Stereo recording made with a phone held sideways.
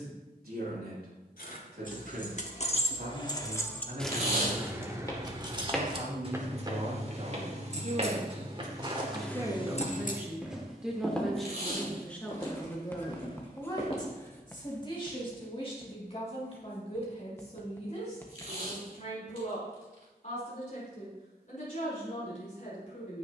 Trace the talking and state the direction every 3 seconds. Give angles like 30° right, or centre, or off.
70° right, 60° right, 40° right, 10° right, 20° left, 40° left, 50° left, 50° left.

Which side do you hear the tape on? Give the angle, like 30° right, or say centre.
60° right.